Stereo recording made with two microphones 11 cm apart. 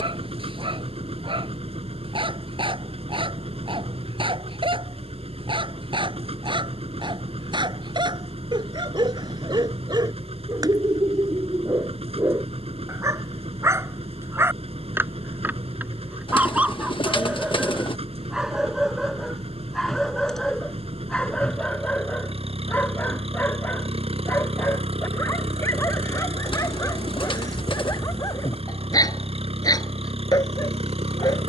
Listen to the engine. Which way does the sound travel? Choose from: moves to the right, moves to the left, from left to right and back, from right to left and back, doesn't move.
doesn't move.